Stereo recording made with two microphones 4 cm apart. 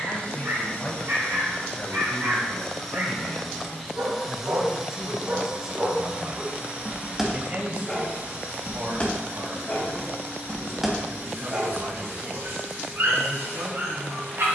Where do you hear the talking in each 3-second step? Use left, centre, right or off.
left, centre, right, right, right.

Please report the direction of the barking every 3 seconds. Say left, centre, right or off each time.
right, right, centre, centre, right.